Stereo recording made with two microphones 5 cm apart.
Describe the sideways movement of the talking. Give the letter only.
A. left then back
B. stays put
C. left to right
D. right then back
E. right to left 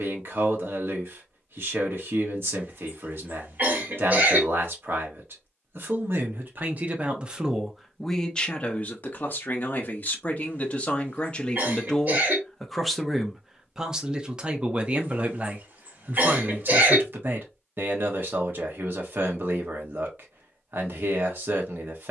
A.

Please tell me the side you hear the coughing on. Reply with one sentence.
You can hear the coughing on the right.